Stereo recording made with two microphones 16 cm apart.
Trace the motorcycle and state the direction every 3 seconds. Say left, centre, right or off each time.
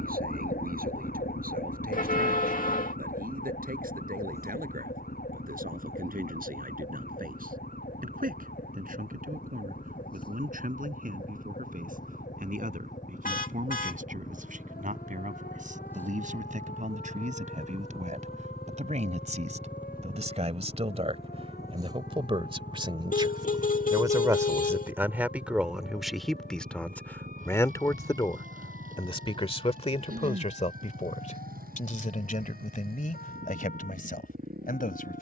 off, left, left, left, left, centre, centre, right, right, right, right, right.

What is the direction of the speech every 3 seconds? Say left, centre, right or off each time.
right, right, right, right, right, right, right, right, centre, left, left, left.